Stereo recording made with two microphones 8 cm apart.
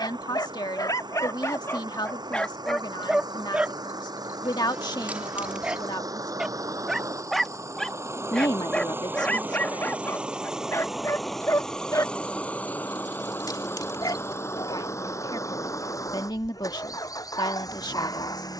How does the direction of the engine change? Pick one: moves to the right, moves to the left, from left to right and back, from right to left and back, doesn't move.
moves to the left.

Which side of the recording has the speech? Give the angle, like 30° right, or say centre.
70° left.